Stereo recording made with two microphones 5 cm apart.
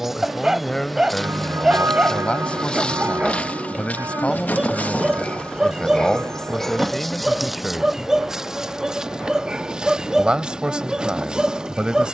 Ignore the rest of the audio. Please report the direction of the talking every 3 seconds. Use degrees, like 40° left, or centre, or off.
20° left, 20° left, centre, 20° right.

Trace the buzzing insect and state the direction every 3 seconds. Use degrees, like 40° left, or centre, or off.
10° left, 30° left, centre, 20° right.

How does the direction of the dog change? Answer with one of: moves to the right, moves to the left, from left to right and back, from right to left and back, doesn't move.
doesn't move.